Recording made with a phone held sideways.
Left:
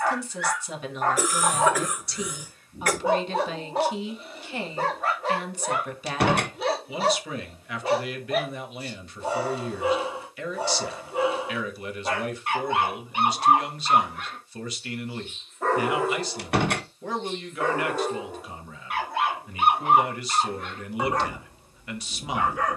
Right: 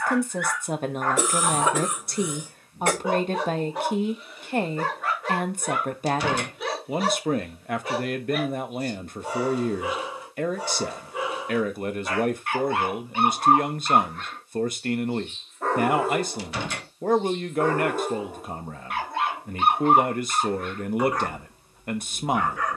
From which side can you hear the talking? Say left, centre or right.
right.